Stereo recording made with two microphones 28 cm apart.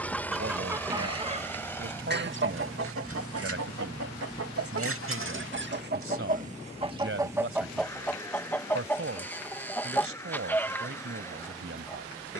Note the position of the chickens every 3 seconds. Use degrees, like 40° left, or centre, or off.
20° right, 50° right, 10° right, 10° left.